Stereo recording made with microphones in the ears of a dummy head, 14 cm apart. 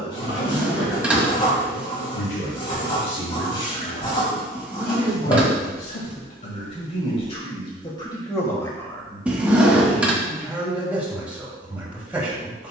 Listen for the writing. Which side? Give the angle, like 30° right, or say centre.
30° left.